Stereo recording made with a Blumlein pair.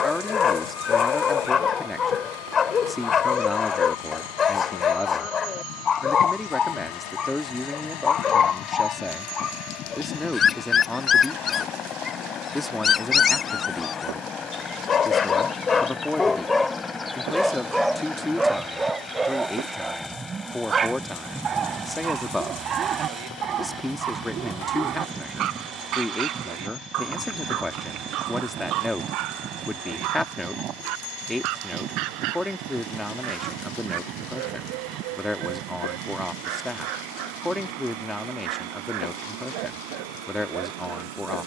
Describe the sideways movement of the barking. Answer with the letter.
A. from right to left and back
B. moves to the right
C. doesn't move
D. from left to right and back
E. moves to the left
B.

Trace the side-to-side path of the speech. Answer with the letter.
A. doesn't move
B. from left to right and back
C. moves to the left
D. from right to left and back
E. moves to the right
A.